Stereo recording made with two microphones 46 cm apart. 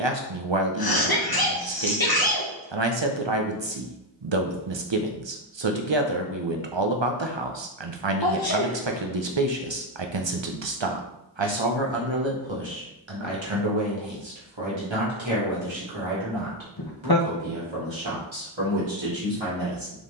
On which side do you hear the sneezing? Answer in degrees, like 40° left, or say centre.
50° left.